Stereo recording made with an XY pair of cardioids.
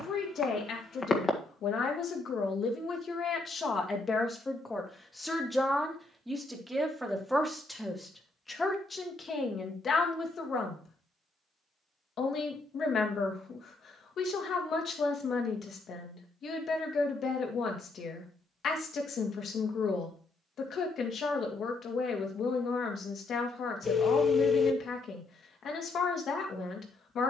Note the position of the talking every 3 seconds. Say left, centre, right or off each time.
left, left, centre, left, left, left, left, left, left.